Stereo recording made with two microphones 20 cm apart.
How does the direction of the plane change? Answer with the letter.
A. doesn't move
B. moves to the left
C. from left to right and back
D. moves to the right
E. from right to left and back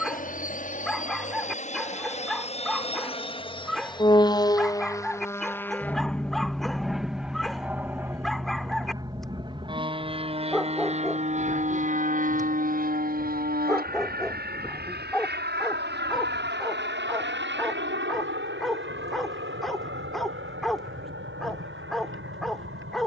D.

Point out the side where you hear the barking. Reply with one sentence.
In this clip you hear the barking in the centre.